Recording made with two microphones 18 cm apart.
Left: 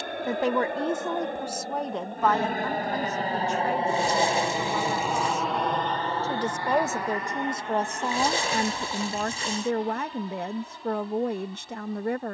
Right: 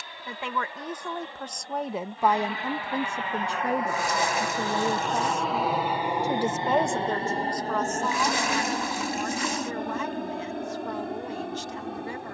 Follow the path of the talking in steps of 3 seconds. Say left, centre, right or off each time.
centre, right, left, left.